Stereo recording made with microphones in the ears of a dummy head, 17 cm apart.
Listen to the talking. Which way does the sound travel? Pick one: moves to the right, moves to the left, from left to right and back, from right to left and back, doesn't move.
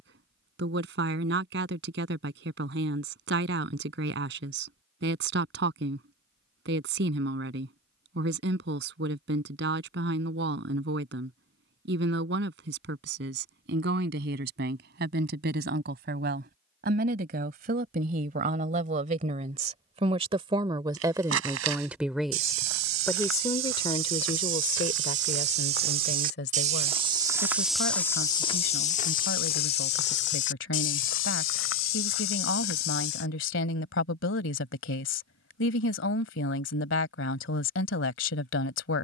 moves to the left.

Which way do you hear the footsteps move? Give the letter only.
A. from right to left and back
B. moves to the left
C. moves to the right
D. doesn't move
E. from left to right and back
B.